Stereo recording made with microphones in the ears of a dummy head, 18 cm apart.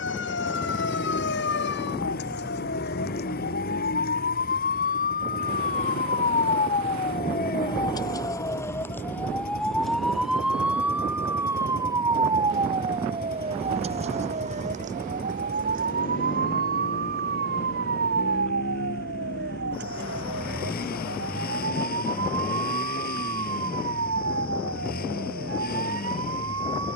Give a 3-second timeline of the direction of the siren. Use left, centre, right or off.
left, left, left, centre, right, right, right, right, right.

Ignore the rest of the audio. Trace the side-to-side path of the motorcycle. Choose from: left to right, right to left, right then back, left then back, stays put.
stays put.